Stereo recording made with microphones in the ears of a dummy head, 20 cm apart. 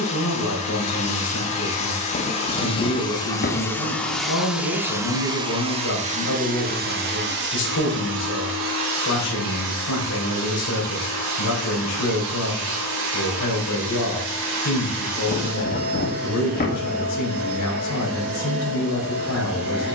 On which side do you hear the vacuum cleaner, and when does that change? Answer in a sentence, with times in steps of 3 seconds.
You can hear the vacuum cleaner on the left from 0 s, in the centre from 3 s and on the right from 6 s.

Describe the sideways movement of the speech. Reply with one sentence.
In this clip you hear the speech stay put.